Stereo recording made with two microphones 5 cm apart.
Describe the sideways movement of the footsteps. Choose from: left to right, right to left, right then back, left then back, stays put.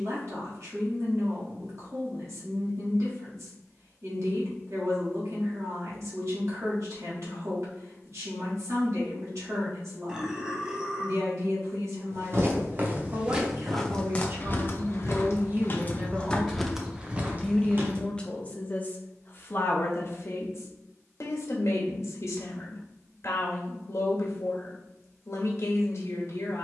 left then back.